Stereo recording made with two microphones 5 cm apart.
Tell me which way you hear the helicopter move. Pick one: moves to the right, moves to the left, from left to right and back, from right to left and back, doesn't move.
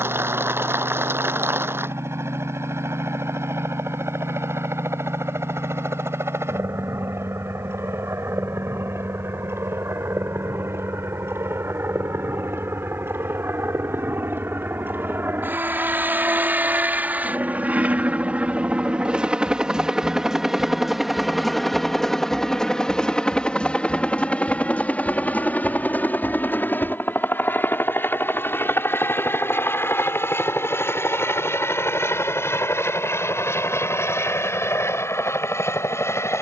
moves to the left.